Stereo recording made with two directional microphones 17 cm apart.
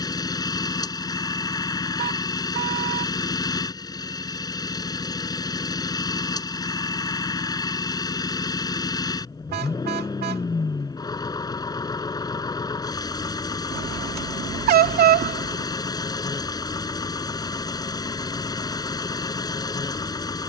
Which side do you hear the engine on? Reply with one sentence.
You can hear the engine on the left.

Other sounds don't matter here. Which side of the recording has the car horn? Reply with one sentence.
In this clip you hear the car horn on the right.